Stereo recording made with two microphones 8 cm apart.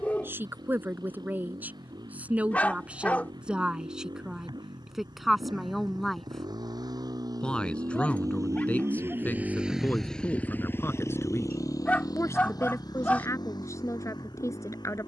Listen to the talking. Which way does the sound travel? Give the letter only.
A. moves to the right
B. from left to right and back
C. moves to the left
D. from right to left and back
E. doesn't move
C.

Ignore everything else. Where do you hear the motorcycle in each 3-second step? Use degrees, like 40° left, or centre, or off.
80° right, 80° right, 60° right, 20° left, 70° left.